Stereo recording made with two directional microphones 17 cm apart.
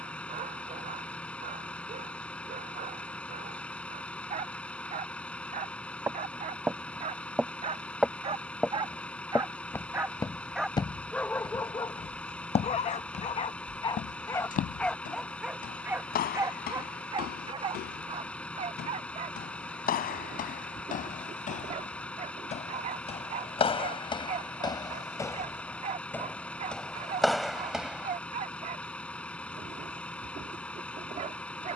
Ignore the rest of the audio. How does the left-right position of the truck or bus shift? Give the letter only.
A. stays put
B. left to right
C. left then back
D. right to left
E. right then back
A.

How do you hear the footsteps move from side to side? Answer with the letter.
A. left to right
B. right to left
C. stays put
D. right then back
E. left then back
E.